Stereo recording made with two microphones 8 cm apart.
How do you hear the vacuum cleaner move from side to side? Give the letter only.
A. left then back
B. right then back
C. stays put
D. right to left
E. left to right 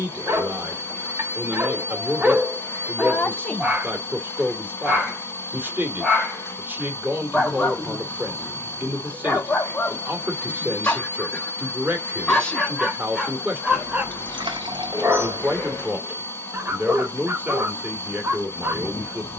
C.